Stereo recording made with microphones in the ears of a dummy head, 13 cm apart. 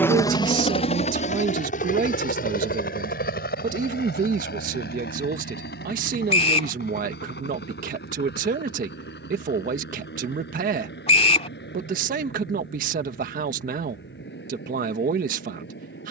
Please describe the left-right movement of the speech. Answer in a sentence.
You can hear the speech stay put.